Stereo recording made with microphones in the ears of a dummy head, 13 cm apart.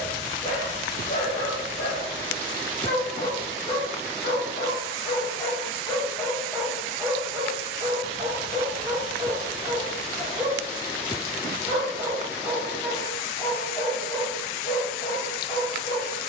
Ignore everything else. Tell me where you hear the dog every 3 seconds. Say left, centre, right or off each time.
left, left, right, right, centre, left.